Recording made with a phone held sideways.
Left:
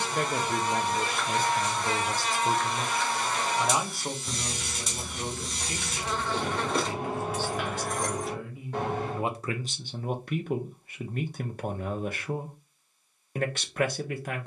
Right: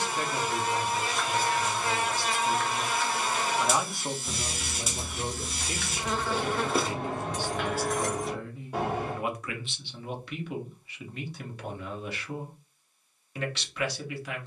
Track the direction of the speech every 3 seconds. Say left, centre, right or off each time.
left, centre, centre, left, left.